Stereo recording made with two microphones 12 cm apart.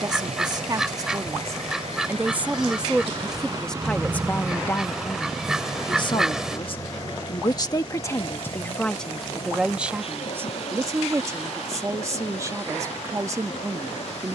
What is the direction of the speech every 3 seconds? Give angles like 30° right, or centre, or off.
20° right, 10° left, 30° left, 20° right, 20° right.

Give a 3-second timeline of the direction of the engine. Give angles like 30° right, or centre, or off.
60° right, 10° right, 30° left, 50° left, 60° left.